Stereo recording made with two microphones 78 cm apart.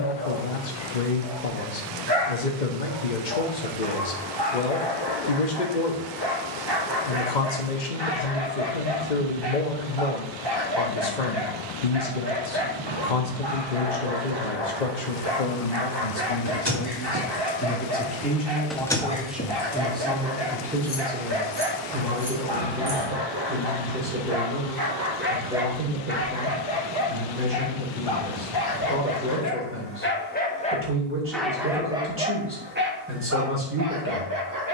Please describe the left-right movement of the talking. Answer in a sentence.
You can hear the talking move from left to right.